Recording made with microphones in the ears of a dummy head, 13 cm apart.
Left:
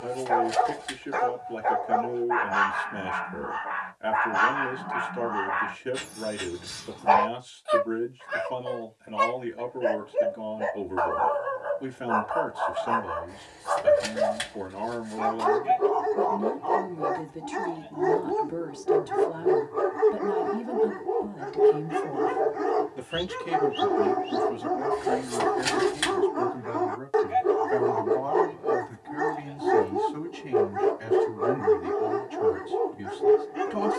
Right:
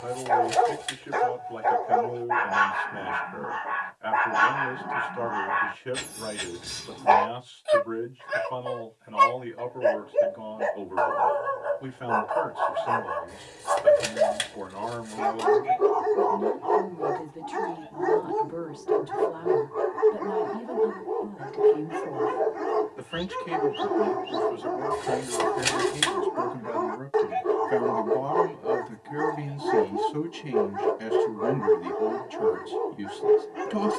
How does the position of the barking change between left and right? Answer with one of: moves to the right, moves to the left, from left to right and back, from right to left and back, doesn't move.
moves to the left.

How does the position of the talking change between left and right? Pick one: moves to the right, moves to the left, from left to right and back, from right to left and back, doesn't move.
moves to the right.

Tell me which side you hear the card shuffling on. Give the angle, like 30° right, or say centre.
20° right.